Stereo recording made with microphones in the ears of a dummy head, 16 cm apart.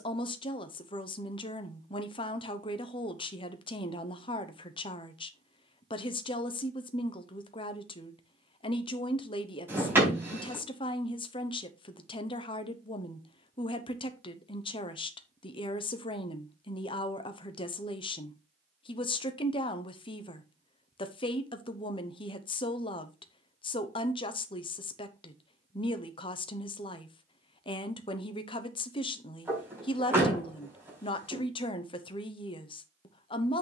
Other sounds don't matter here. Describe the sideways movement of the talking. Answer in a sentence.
In this clip you hear the talking stay in one place.